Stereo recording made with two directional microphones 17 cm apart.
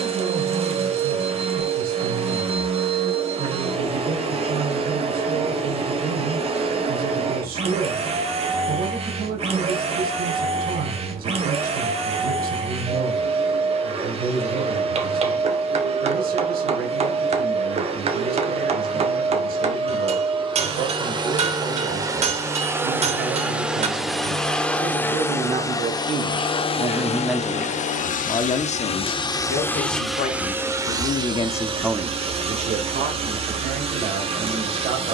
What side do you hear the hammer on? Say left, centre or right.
right.